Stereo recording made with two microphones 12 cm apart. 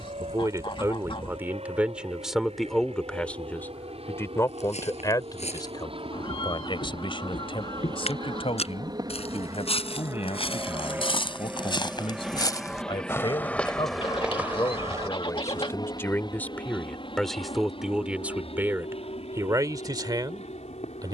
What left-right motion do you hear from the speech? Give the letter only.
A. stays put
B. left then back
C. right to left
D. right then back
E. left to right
B.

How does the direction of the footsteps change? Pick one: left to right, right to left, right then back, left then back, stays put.
left to right.